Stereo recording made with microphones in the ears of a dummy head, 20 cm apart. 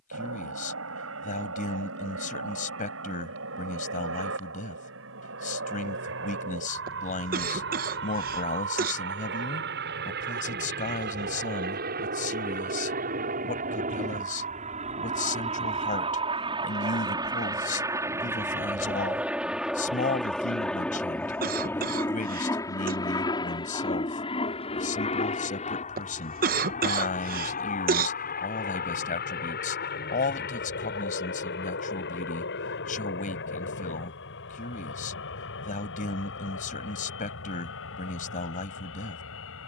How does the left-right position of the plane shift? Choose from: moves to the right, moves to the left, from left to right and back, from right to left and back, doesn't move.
moves to the left.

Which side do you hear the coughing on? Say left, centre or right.
right.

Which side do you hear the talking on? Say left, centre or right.
left.